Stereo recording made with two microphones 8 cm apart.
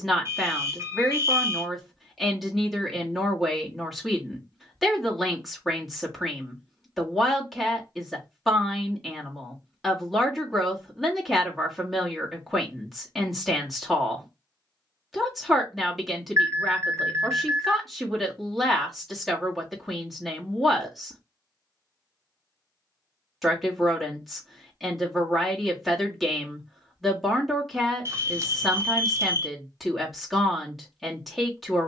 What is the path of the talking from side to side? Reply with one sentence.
In this clip you hear the talking stay in one place.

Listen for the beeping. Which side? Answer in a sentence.
You can hear the beeping on the right.